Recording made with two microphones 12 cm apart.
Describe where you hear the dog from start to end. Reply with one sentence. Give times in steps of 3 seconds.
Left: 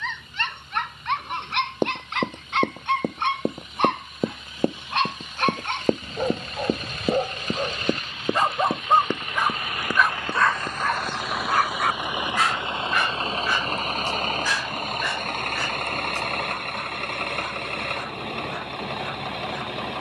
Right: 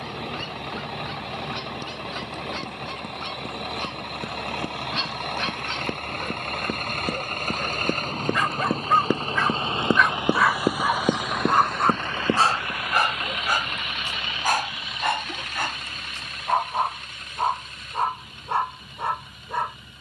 In this clip you hear the dog on the left from 0 s, in the centre from 9 s and on the right from 12 s.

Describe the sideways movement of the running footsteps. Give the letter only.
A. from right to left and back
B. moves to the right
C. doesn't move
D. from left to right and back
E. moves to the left
B.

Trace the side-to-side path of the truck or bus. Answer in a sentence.
In this clip you hear the truck or bus go from the right side to the left.